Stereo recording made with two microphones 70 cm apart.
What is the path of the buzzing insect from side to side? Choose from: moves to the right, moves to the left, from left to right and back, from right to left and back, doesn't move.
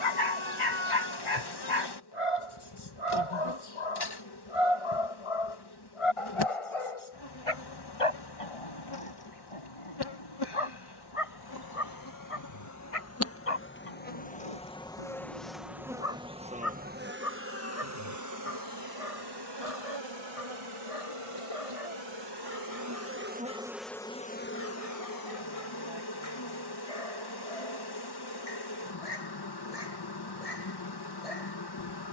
from left to right and back.